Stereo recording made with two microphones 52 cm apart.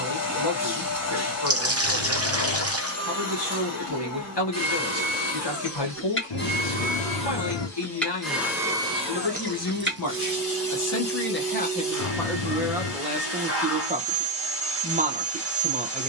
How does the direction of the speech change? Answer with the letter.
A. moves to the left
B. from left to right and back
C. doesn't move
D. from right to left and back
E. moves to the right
E.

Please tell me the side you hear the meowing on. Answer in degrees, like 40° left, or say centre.
60° left.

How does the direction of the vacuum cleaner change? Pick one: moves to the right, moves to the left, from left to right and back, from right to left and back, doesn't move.
moves to the right.